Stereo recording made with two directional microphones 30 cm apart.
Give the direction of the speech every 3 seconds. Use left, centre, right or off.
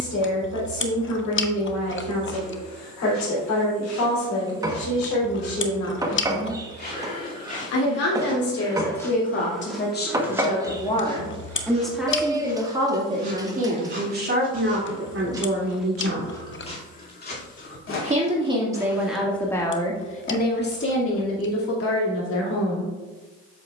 left, left, left, left, right, right, centre, left.